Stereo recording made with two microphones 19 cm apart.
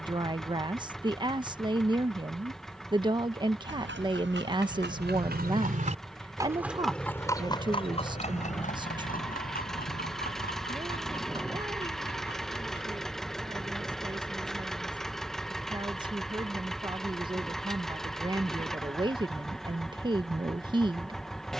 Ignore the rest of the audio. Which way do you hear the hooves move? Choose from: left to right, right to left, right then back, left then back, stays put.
right to left.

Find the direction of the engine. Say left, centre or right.
centre.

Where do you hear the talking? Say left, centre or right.
right.